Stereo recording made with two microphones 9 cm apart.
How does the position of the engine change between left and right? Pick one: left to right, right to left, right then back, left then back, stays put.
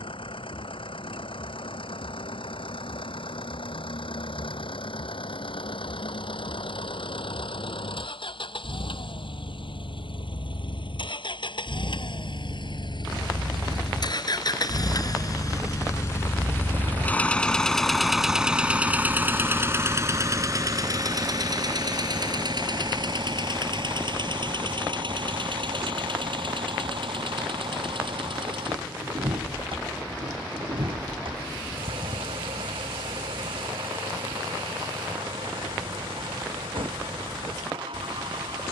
left to right.